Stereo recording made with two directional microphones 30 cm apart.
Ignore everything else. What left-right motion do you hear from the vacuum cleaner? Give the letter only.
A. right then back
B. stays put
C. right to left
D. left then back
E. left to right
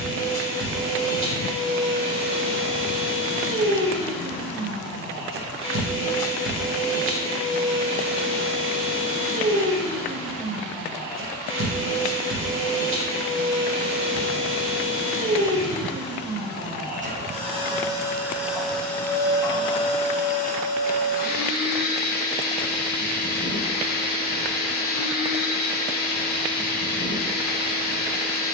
C.